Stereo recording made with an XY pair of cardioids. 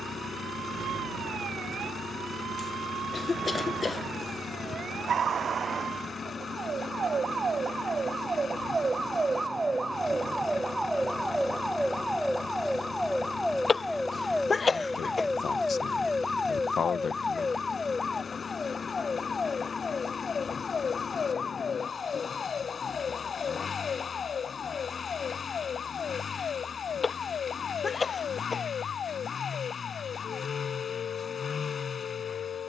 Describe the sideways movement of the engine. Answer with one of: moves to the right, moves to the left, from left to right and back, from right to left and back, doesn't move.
doesn't move.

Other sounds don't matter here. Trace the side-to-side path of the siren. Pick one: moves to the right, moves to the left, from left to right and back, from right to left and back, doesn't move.
moves to the left.